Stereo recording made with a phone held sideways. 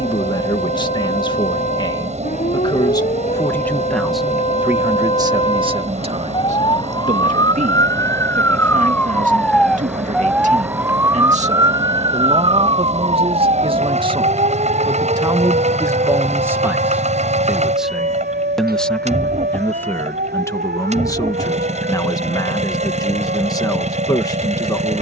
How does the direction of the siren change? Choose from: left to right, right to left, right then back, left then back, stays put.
left to right.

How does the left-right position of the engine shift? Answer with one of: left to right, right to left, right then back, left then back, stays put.
stays put.